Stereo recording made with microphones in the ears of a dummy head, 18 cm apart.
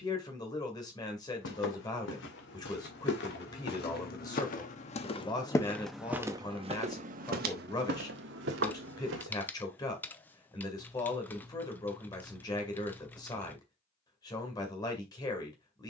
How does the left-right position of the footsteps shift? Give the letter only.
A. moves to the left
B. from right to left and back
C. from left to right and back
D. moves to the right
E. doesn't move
D.